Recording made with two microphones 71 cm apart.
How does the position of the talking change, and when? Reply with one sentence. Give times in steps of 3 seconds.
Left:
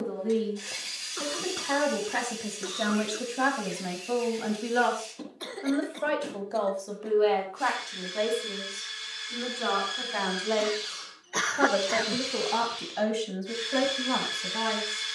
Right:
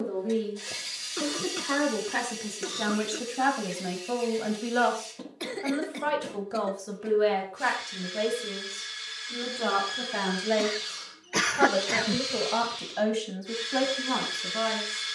In this clip you hear the talking on the left from 0 s, in the centre from 3 s, on the right from 6 s and in the centre from 12 s.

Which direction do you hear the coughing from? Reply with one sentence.
In this clip you hear the coughing on the right.